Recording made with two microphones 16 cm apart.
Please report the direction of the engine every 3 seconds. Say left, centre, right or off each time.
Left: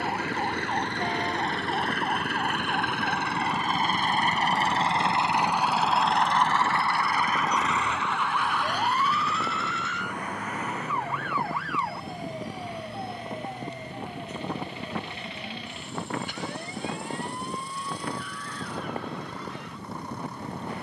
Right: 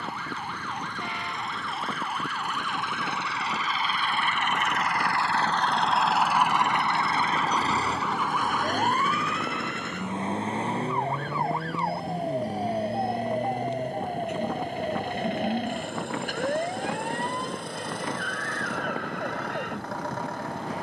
left, left, right, right, right, right, right.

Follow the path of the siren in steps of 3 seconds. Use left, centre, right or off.
left, left, centre, right, right, right, right.